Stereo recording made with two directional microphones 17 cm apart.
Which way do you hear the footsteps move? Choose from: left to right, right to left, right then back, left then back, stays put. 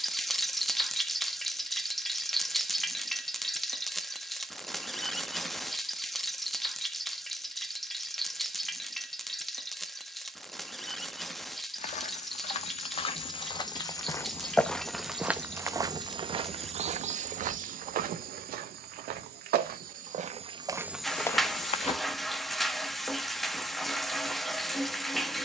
right then back.